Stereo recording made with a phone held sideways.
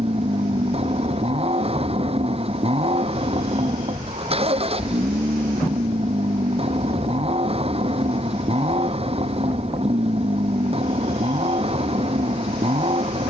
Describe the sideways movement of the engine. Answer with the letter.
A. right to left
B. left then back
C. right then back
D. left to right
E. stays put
E.